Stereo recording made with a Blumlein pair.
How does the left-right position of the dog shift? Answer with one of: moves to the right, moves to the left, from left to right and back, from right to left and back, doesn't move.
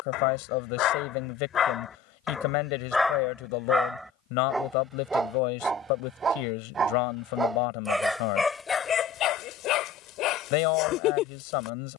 from left to right and back.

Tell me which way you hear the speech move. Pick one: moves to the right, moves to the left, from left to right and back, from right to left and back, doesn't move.
doesn't move.